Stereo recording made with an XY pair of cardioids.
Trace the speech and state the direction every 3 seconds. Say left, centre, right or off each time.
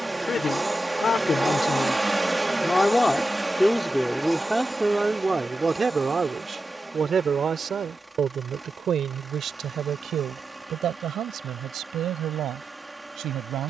left, centre, right, right, right.